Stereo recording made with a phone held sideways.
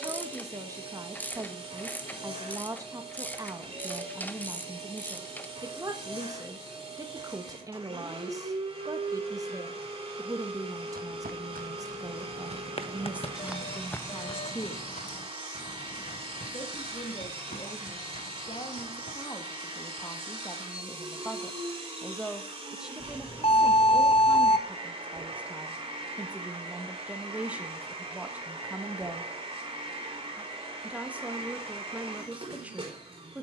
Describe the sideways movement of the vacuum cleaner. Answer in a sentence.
You can hear the vacuum cleaner stay put.